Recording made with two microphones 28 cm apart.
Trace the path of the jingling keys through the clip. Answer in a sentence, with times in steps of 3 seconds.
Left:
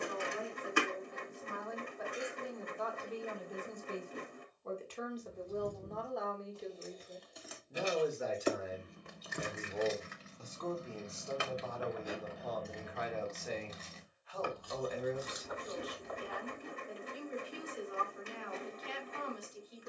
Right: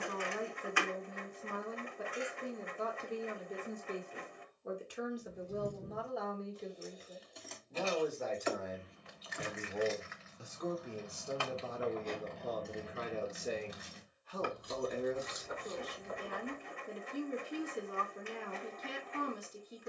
In this clip you hear the jingling keys not at all from 0 s, on the right from 3 s, in the centre from 6 s, on the left from 9 s, in the centre from 12 s, on the right from 15 s and not at all from 18 s.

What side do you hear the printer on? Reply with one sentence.
In this clip you hear the printer on the left.